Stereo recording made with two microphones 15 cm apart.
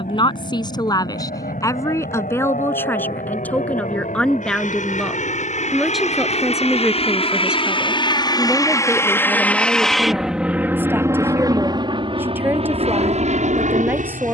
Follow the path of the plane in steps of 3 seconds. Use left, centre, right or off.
left, left, left, centre, right.